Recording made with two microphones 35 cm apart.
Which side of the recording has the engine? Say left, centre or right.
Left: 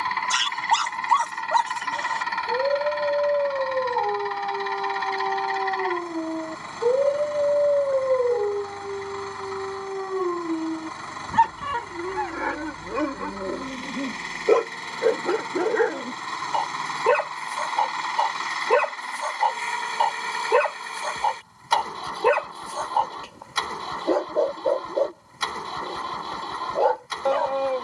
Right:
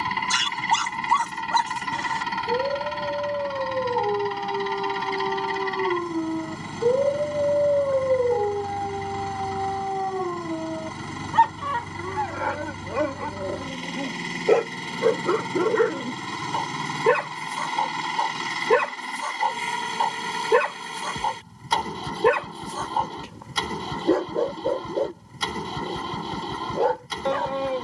right.